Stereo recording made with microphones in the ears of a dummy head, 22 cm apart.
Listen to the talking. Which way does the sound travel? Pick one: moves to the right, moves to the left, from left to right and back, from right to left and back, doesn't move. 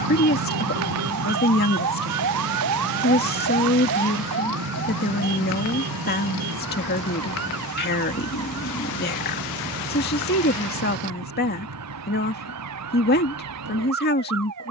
doesn't move.